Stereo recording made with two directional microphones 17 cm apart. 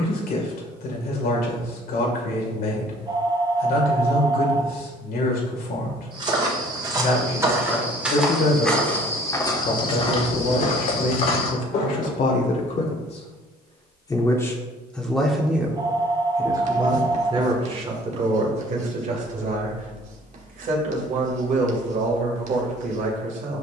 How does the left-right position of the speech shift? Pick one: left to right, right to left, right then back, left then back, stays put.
left to right.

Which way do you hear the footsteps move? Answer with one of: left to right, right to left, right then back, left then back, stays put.
right to left.